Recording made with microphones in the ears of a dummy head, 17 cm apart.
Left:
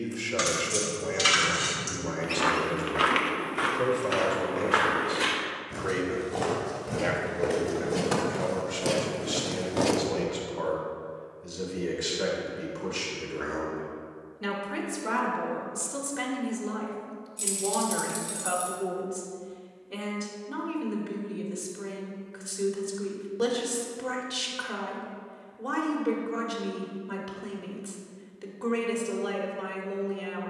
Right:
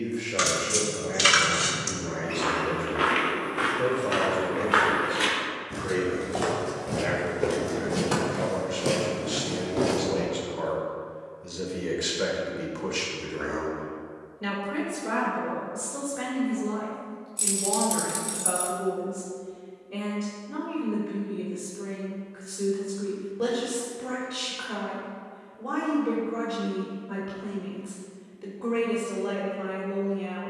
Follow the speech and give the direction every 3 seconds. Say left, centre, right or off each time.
left, left, left, centre, centre, left, left, left, left, left.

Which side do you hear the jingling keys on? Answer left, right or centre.
centre.